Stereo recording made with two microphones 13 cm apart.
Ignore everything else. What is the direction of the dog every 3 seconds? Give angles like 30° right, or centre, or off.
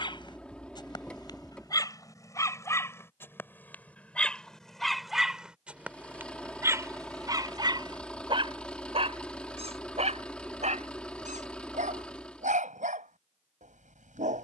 30° left, centre, 30° right, 60° right, 70° right.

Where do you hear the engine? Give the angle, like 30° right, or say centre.
10° left.